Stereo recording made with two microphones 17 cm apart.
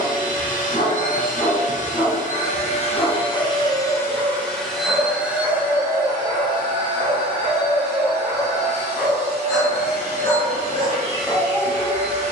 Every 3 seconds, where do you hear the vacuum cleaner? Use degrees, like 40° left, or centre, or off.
50° left, 10° left, 30° right, 40° right.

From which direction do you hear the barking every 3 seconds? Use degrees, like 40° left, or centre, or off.
30° left, centre, 20° right, 20° left.